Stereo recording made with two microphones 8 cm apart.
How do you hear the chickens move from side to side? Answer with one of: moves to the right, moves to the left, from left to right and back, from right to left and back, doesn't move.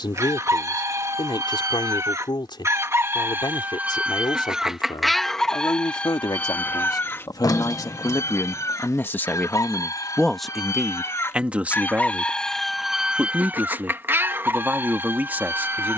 from right to left and back.